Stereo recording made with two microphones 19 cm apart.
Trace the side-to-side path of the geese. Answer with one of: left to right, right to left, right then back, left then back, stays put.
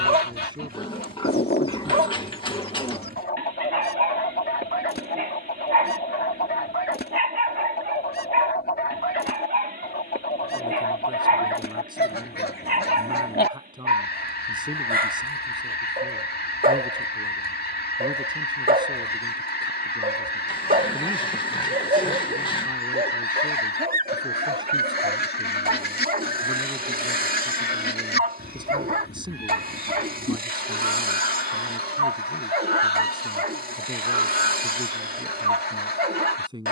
stays put.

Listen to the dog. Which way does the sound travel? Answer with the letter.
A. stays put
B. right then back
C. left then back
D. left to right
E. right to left
A.